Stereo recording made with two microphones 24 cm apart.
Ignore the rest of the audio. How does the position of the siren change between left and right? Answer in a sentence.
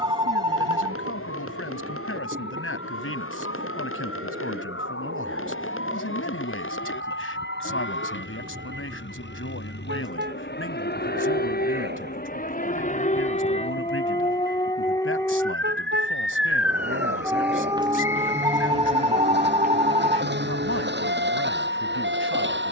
In this clip you hear the siren travel towards the right.